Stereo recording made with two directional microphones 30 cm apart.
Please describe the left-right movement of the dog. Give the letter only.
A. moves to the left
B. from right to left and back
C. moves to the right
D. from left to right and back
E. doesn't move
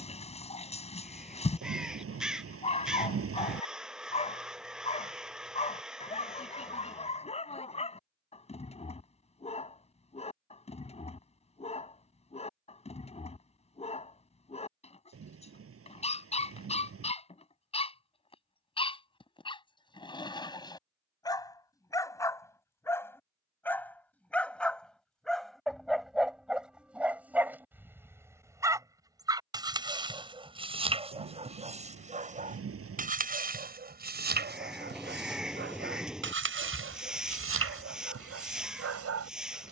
C.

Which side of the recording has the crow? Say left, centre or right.
centre.